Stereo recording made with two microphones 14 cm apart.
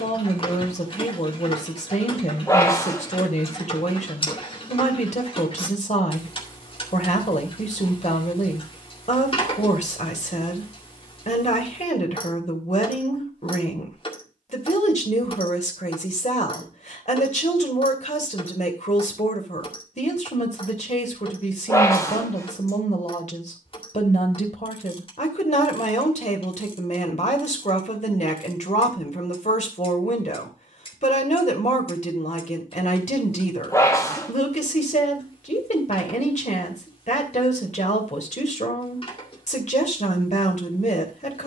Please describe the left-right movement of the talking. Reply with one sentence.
You can hear the talking stay in one place.